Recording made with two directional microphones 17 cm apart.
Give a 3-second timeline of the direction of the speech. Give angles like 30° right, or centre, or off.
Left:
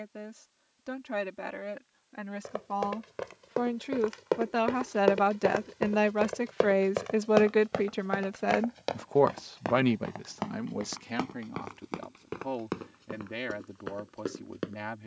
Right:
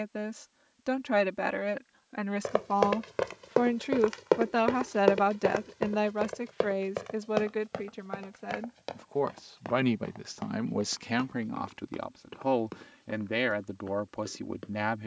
40° right, 10° right, 40° left, 10° right, 40° right.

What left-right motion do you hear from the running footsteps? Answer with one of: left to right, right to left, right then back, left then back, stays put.
right to left.